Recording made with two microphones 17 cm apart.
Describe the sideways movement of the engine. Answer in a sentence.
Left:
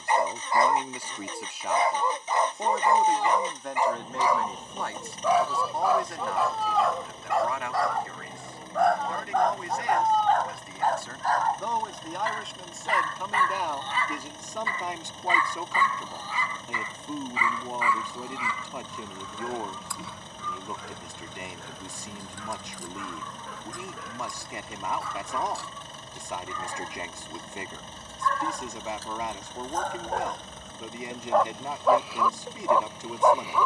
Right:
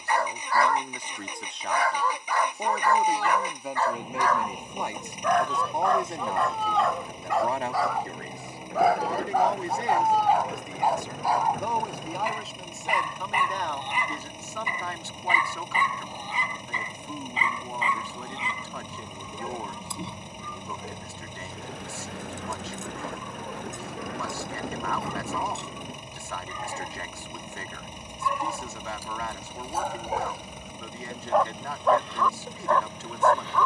In this clip you hear the engine stay in one place.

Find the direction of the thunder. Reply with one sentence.
You can hear the thunder on the right.